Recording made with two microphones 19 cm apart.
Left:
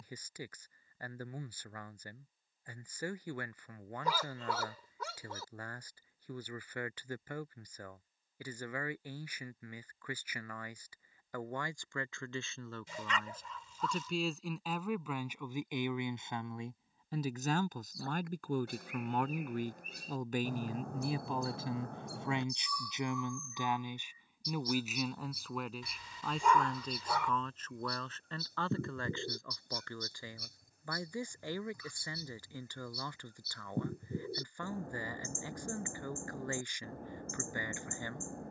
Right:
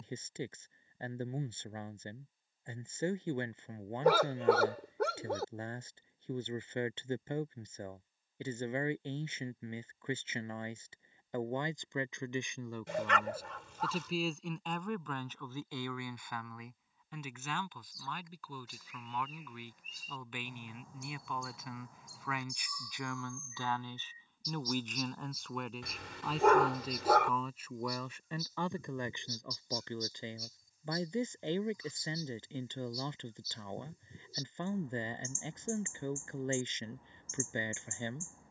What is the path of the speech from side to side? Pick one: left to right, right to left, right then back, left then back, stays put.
left then back.